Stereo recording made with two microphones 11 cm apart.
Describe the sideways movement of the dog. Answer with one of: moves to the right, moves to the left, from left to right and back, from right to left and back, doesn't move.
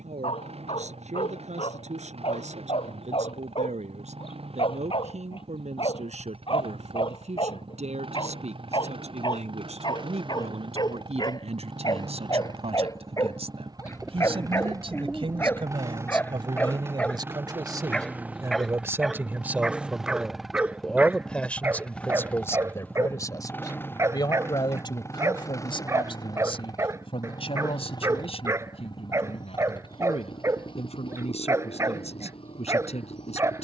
moves to the right.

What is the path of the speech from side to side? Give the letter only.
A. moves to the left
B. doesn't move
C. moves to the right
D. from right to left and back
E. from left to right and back
A.